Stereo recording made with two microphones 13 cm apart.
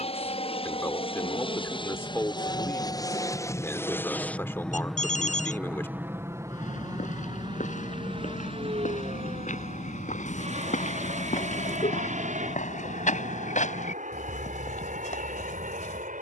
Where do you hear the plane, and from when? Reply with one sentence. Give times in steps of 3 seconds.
In this clip you hear the plane on the left from 0 s, in the centre from 3 s and on the right from 6 s.